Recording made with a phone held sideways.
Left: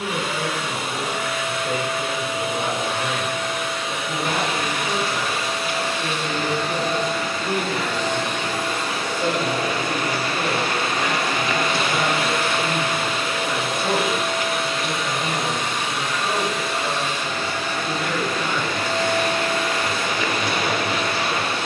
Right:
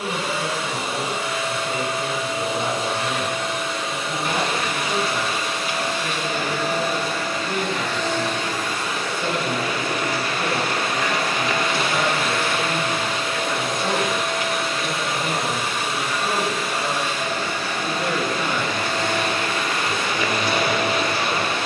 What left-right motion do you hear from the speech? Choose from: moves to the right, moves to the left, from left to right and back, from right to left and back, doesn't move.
moves to the right.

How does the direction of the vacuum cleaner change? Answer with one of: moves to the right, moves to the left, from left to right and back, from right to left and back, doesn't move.
from right to left and back.